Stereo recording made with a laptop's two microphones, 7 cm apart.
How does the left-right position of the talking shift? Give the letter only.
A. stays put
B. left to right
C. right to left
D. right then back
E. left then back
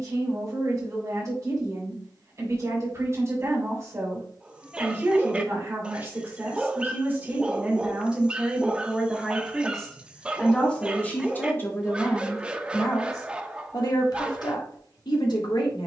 C.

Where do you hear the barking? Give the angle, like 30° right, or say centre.
10° right.